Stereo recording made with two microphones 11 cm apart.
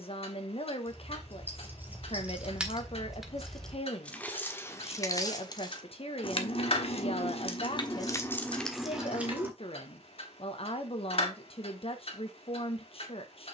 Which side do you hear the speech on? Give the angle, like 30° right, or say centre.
60° left.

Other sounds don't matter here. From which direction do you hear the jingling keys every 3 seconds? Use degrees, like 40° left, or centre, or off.
20° right, 20° left, 40° left, 10° right, off.